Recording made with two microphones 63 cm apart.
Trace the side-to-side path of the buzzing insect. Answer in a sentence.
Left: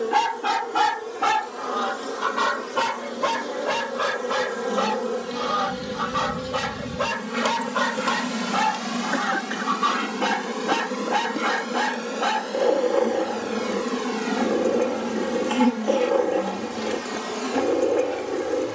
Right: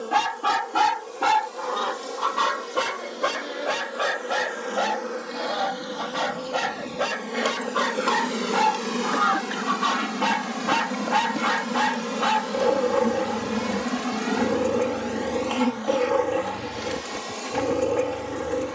In this clip you hear the buzzing insect go right and come back.